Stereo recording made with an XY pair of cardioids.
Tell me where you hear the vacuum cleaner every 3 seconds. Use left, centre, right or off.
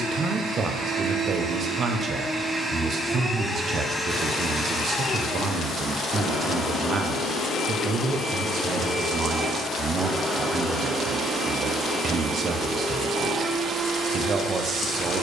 right, centre, left, centre, right.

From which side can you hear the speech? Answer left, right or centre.
right.